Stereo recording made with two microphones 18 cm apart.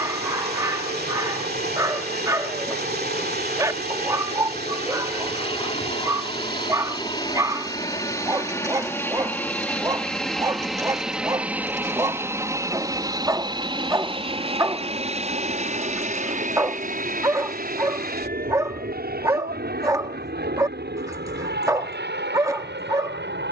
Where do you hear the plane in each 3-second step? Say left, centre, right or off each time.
left, left, left, centre, right, right, right, right.